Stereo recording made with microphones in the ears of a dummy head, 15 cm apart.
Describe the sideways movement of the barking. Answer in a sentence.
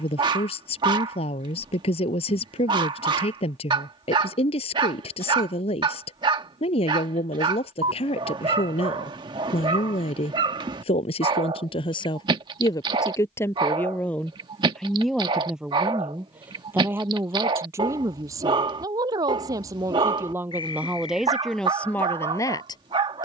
In this clip you hear the barking stay in one place.